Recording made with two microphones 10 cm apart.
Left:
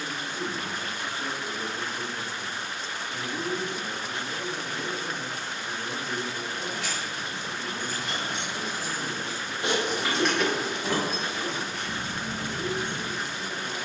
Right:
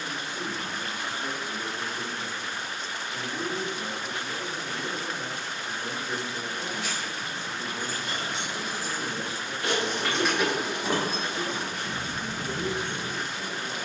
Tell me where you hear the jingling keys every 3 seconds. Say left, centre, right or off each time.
off, off, left, centre, right.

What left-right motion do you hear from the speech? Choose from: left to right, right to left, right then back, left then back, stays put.
left to right.